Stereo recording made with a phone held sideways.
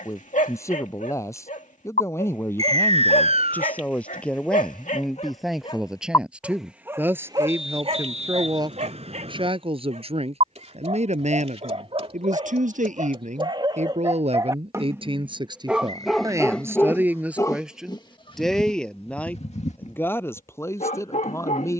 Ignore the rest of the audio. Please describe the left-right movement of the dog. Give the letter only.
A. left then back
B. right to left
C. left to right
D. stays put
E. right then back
E.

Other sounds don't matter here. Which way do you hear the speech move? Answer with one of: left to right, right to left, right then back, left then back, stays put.
right then back.